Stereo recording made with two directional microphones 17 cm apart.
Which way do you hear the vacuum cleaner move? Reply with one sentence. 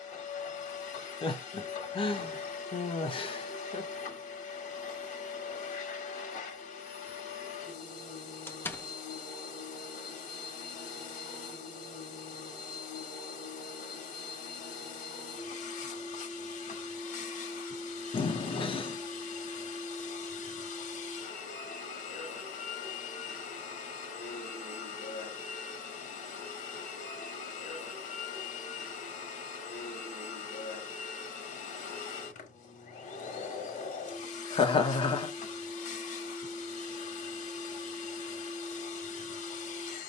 In this clip you hear the vacuum cleaner stay in one place.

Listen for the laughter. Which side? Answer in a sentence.
In this clip you hear the laughter on the left.